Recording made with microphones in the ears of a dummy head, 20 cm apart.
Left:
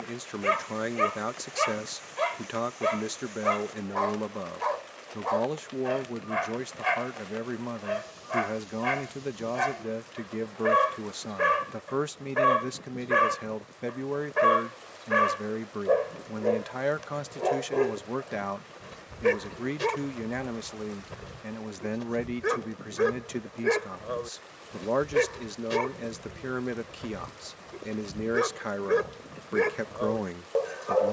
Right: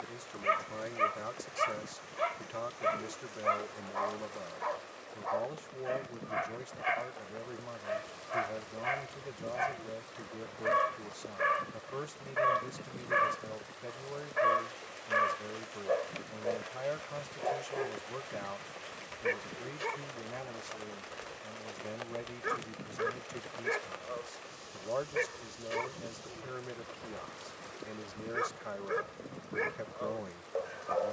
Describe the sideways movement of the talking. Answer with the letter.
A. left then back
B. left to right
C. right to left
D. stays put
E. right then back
D.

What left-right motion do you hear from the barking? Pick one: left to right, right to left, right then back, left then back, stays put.
stays put.